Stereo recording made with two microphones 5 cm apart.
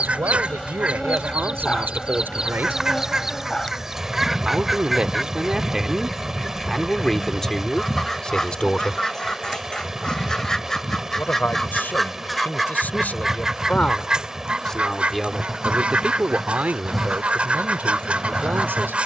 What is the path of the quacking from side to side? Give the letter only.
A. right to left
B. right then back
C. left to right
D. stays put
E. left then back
E.